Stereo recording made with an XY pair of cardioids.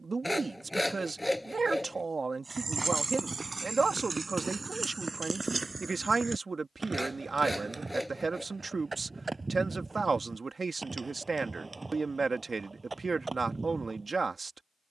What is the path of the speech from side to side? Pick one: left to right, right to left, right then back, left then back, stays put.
stays put.